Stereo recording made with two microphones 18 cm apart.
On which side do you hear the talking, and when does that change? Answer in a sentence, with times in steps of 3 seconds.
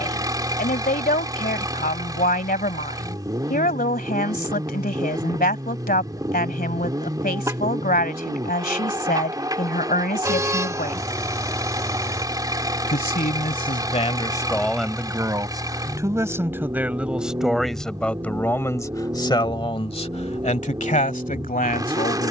You can hear the talking on the left from 0 s, in the centre from 15 s and on the left from 18 s.